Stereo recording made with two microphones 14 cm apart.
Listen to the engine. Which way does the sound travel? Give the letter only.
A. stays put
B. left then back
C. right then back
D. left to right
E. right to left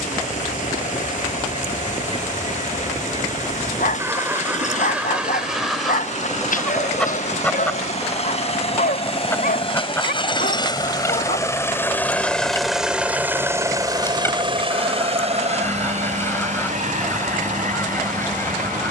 D.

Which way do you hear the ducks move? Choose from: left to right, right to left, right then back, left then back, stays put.
right to left.